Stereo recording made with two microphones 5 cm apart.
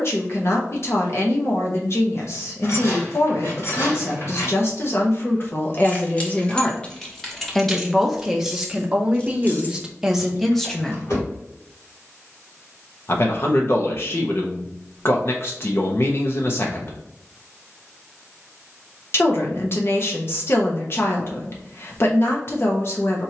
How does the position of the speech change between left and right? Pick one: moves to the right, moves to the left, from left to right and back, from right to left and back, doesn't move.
from left to right and back.